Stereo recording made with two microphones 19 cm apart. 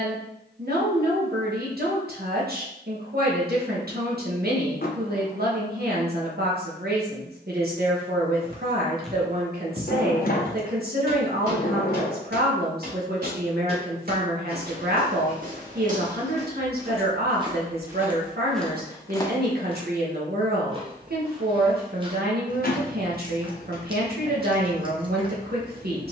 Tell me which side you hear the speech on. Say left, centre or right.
right.